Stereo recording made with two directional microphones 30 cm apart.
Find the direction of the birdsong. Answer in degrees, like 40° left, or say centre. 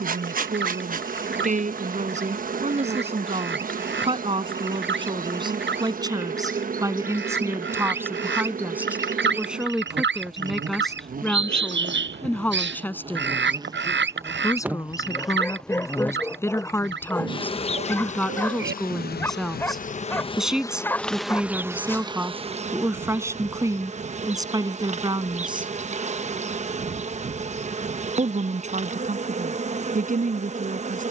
40° right.